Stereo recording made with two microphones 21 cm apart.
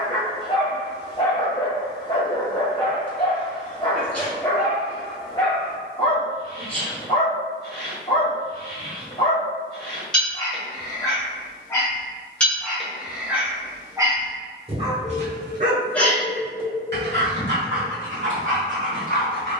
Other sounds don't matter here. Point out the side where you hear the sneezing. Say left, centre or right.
centre.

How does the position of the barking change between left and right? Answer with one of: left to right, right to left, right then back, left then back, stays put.
left to right.